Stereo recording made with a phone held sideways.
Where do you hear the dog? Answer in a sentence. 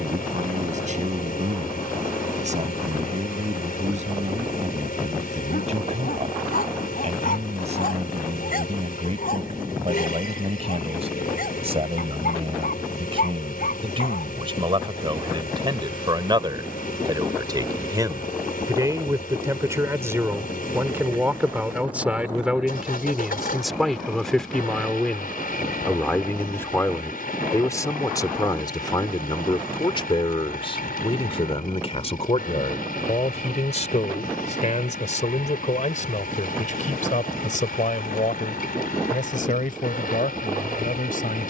In this clip you hear the dog on the left.